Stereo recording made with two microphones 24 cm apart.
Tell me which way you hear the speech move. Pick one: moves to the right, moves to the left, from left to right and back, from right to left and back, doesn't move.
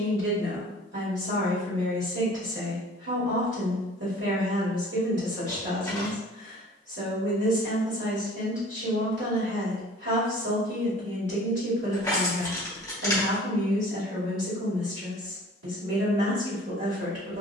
doesn't move.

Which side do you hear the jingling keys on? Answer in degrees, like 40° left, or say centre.
10° left.